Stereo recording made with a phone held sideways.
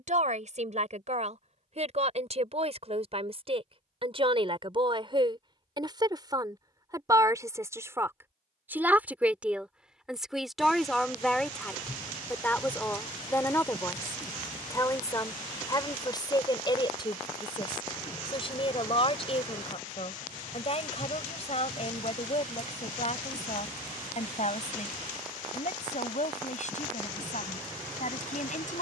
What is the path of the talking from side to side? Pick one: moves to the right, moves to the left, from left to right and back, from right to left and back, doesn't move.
moves to the left.